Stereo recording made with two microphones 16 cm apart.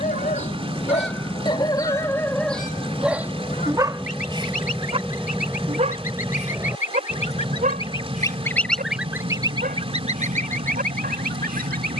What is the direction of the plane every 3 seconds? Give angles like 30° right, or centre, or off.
40° left, 10° left, 20° right, 40° right.